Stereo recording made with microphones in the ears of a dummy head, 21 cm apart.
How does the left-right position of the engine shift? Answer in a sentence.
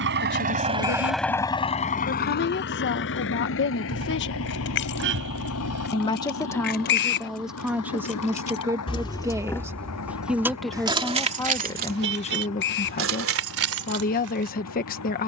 In this clip you hear the engine move from right to left.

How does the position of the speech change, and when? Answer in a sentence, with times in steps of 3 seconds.
In this clip you hear the speech on the left from 0 s, in the centre from 6 s and on the left from 12 s.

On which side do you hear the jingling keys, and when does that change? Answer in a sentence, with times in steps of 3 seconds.
You can hear the jingling keys not at all from 0 s, on the left from 3 s, in the centre from 9 s and on the right from 12 s.